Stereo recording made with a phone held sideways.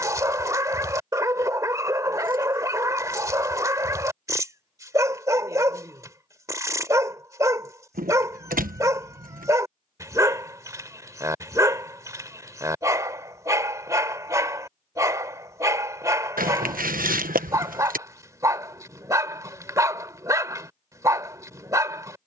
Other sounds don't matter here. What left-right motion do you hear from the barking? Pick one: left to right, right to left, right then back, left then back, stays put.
stays put.